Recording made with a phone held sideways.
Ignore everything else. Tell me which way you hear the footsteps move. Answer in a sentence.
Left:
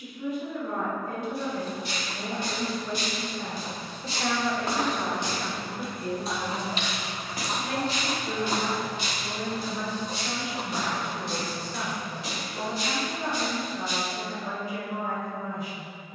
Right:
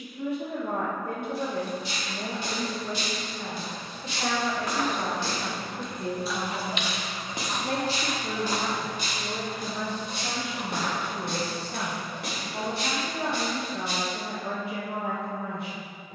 In this clip you hear the footsteps go from the left side to the right.